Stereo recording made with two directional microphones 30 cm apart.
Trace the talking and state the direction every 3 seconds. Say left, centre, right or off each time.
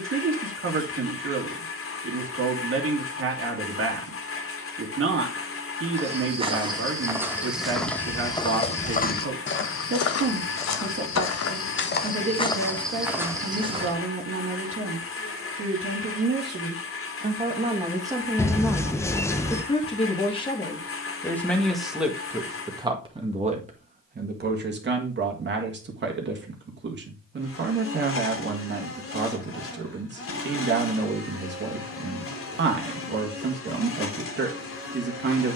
right, right, right, right, right, right, centre, centre, right, right, right, right.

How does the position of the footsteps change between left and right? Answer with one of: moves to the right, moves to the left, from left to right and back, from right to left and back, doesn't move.
from right to left and back.